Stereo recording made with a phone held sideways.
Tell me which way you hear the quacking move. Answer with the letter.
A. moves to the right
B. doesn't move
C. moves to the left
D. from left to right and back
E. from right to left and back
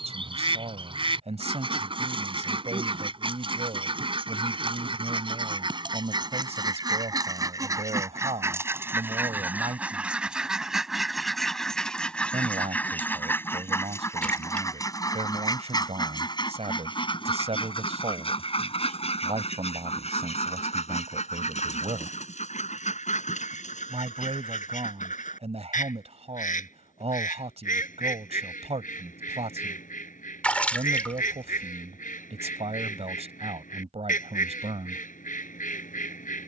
C.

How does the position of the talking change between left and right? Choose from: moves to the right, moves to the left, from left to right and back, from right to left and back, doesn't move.
doesn't move.